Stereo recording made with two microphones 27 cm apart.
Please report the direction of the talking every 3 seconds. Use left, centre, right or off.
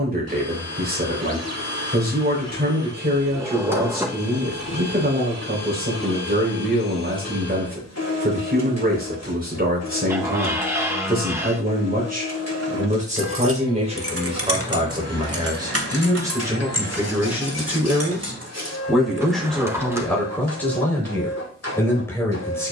right, right, right, right, right, centre, centre, centre.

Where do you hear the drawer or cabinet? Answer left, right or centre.
centre.